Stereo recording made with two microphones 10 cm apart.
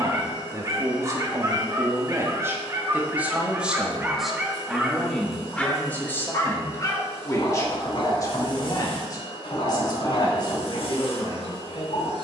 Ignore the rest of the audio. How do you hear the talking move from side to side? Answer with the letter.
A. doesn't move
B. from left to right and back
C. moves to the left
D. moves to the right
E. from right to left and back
C.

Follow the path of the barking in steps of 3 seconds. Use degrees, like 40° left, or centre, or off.
30° right, 10° right, 50° left, 70° left.